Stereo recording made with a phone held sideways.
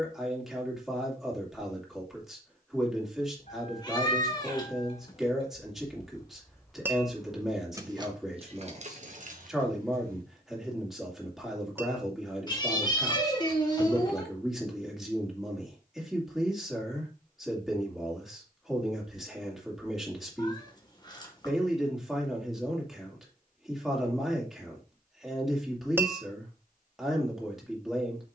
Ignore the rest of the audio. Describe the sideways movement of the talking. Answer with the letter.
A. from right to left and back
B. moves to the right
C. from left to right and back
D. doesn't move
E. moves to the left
D.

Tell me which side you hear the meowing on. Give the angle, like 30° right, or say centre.
30° left.